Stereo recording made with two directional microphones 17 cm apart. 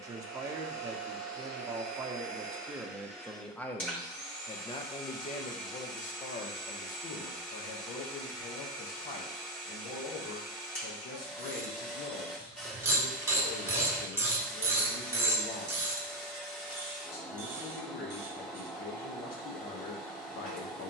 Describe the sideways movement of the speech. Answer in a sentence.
You can hear the speech travel towards the left.